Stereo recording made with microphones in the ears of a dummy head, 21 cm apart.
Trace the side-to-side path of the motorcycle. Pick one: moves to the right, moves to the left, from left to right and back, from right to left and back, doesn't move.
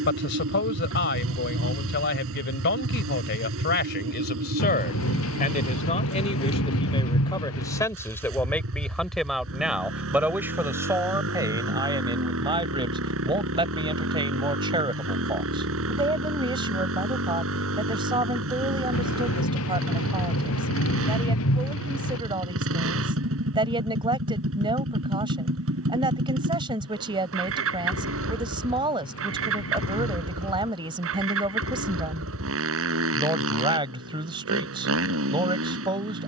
doesn't move.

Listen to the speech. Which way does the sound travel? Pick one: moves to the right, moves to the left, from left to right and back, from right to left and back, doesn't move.
moves to the right.